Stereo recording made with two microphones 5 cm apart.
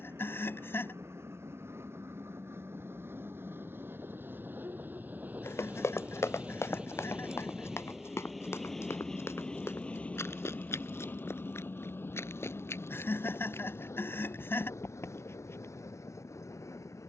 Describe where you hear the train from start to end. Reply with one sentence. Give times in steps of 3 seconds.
In this clip you hear the train on the right from 0 s, in the centre from 6 s and on the left from 9 s.